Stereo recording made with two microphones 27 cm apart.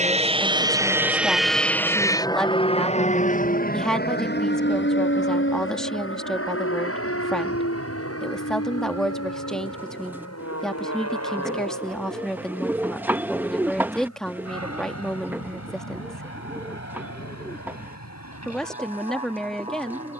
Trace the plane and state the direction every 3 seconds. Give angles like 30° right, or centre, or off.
centre, 40° left, 50° left, 60° left, 60° left, 60° left, 60° left.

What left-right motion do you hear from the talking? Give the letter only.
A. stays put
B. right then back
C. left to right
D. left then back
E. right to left
A.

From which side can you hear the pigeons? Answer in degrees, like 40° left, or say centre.
10° right.